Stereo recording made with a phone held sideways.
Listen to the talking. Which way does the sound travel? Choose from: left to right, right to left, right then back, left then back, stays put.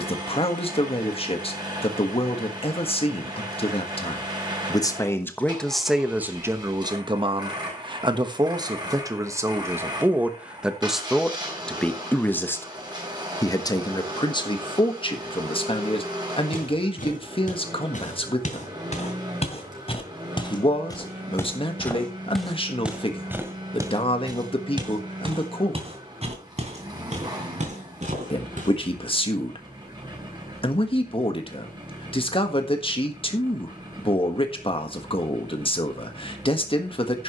right then back.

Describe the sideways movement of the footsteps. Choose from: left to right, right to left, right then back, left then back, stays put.
left to right.